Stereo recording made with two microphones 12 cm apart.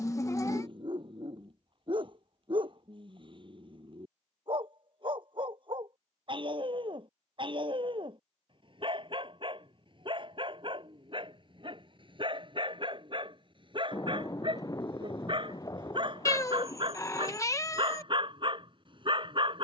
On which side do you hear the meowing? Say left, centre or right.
left.